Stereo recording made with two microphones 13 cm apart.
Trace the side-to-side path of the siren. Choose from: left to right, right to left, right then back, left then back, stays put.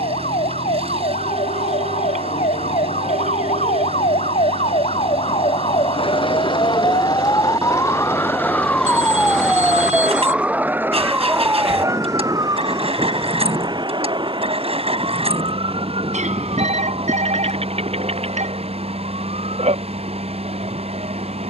left to right.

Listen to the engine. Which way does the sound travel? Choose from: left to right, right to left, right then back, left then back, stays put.
stays put.